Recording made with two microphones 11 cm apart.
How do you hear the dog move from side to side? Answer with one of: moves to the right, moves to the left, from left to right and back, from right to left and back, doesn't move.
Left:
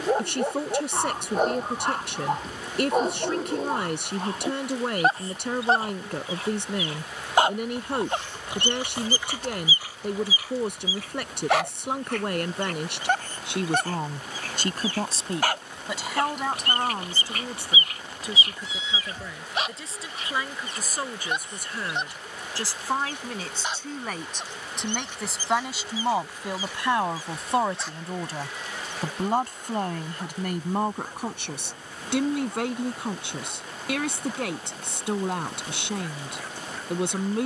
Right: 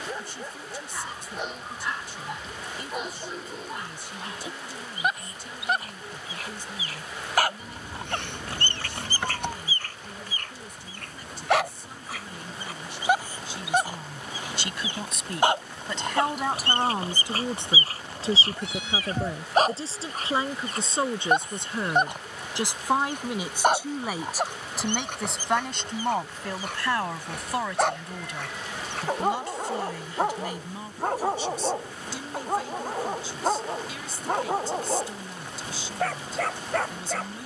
moves to the right.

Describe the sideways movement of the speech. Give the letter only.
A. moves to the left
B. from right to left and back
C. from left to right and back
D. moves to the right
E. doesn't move
C.